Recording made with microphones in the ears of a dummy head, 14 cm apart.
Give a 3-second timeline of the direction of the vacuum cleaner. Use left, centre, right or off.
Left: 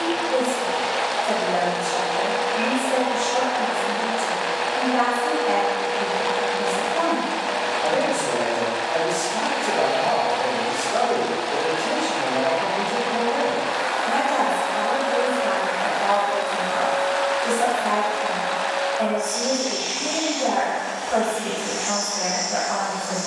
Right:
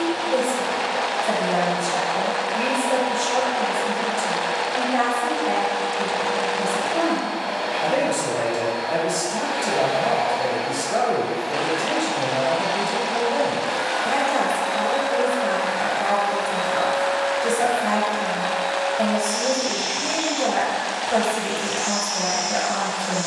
left, centre, right, right, right, right, right, right.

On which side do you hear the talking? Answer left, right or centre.
right.